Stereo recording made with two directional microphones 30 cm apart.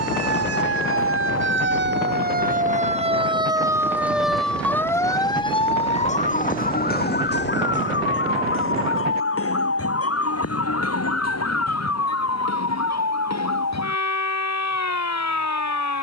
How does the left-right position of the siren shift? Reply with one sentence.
You can hear the siren go from the right side to the left.